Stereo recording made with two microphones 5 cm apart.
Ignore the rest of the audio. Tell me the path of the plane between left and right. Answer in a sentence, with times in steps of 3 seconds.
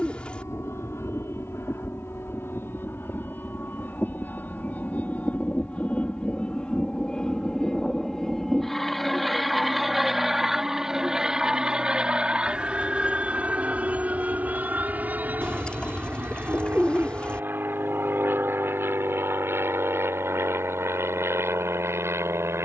In this clip you hear the plane on the left from 0 s, in the centre from 6 s and on the right from 12 s.